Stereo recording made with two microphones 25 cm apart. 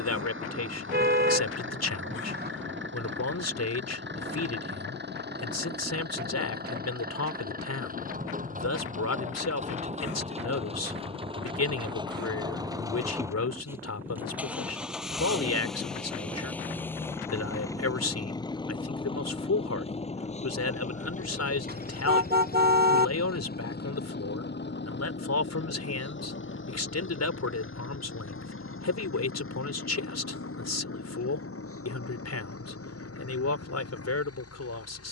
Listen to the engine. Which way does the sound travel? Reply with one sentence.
You can hear the engine travel towards the left.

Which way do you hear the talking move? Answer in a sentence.
In this clip you hear the talking stay put.